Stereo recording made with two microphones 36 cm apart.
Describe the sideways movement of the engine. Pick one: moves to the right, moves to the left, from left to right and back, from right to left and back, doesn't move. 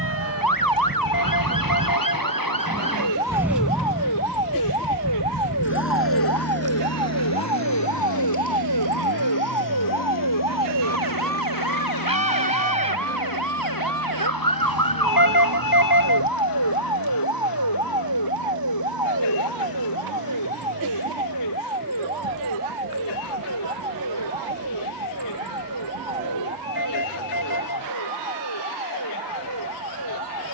moves to the left.